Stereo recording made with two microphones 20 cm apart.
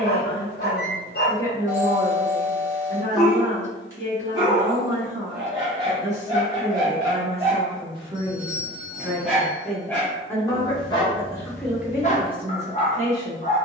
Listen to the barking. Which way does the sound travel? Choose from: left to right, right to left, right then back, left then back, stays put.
right then back.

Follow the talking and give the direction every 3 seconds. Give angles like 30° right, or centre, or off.
30° right, 30° right, 30° right, 10° left, 30° right.